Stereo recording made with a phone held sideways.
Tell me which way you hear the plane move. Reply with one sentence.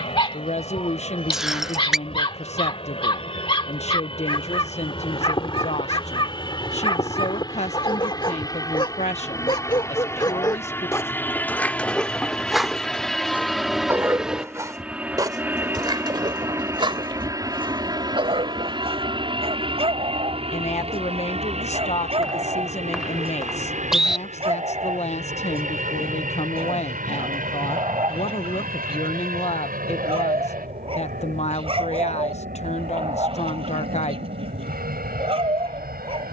In this clip you hear the plane move from left to right.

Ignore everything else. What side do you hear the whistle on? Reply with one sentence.
You can hear the whistle in the centre.